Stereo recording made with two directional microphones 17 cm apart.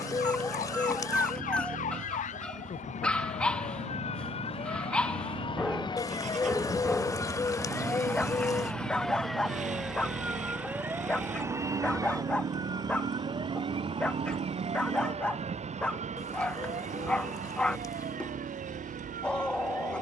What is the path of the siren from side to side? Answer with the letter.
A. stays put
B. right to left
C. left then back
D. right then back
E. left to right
E.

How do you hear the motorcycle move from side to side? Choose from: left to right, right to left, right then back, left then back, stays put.
stays put.